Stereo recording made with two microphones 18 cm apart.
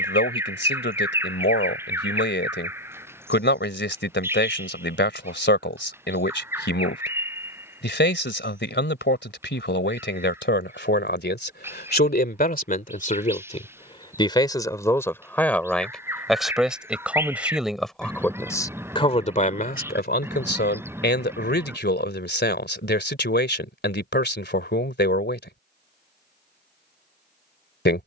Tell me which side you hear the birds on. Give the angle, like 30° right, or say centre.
10° right.